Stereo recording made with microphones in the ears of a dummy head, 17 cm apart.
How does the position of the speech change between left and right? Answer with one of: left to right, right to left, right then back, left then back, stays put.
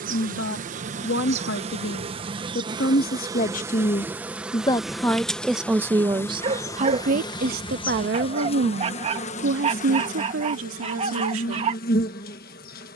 left to right.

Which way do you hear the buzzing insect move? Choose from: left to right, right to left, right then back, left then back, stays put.
right to left.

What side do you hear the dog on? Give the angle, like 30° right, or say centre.
30° right.